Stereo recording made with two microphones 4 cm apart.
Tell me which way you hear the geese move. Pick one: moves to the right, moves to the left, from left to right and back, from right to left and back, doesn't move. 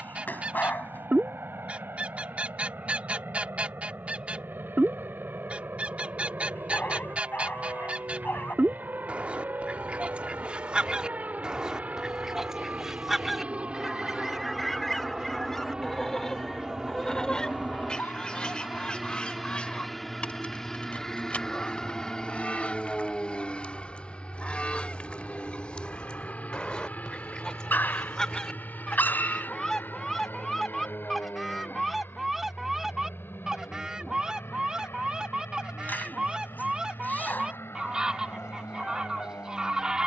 from right to left and back.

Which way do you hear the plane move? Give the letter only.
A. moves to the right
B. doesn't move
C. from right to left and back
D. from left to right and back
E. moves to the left
E.